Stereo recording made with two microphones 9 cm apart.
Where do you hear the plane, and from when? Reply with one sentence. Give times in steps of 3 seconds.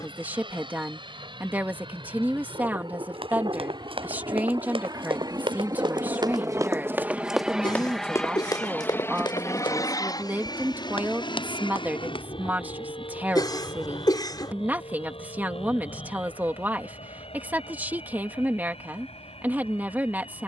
You can hear the plane on the right from 0 s, in the centre from 6 s and on the left from 9 s.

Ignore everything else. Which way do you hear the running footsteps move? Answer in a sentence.
In this clip you hear the running footsteps move from right to left.